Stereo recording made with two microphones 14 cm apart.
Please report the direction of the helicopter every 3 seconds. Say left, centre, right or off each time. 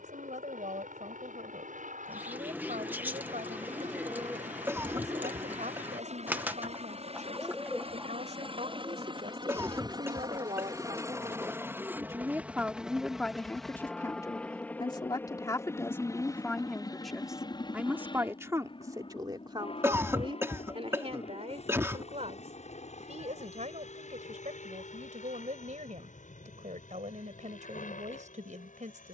right, right, right, right, centre, left, left, left, left, left.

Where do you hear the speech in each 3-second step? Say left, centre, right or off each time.
right, right, right, right, centre, centre, right, right, right, right.